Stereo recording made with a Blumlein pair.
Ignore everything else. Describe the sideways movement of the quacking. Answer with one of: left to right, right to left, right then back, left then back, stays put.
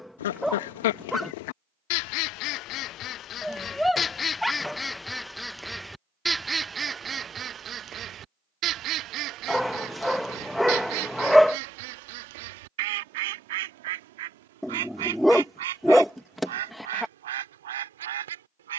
left to right.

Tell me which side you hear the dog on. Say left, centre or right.
centre.